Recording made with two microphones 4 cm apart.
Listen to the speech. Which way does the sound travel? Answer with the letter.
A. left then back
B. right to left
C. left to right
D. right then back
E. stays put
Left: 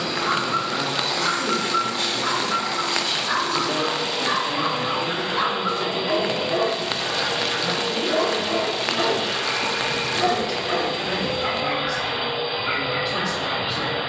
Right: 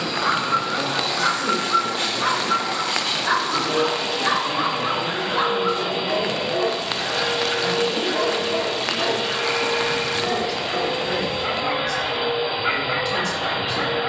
D.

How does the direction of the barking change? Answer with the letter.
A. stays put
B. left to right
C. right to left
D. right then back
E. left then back
E.